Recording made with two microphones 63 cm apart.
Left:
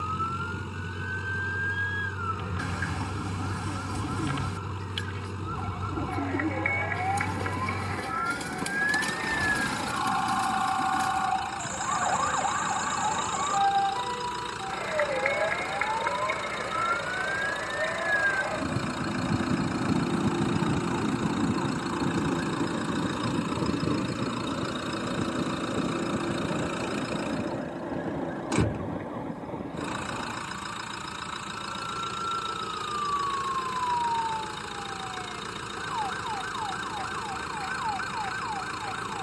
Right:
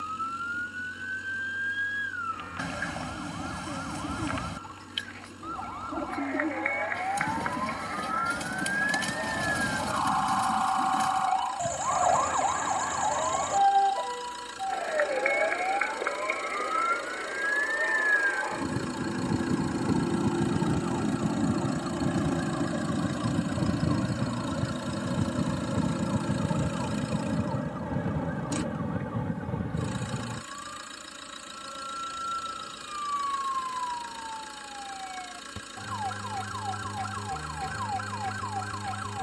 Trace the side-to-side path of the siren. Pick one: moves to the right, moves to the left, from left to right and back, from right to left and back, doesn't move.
moves to the right.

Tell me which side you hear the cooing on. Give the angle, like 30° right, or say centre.
10° right.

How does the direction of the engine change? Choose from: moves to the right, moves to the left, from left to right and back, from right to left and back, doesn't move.
doesn't move.